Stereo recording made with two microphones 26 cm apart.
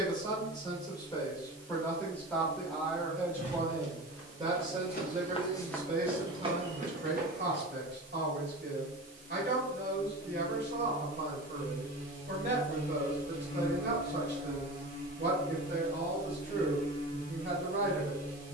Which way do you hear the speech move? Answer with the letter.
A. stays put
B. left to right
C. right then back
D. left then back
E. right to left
B.